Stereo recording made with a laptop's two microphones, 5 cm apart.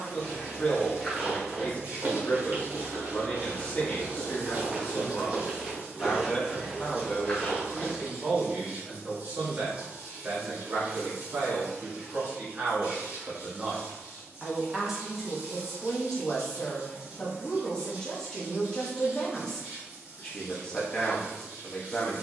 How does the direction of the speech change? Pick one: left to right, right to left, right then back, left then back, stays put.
right then back.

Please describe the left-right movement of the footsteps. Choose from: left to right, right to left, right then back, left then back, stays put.
right then back.